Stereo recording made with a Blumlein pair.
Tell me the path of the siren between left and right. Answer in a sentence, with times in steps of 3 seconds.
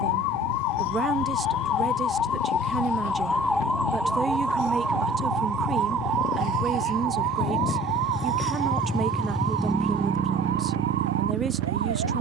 You can hear the siren on the left from 0 s, in the centre from 3 s and on the right from 6 s.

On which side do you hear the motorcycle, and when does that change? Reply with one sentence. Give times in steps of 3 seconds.
In this clip you hear the motorcycle on the left from 0 s and on the right from 9 s.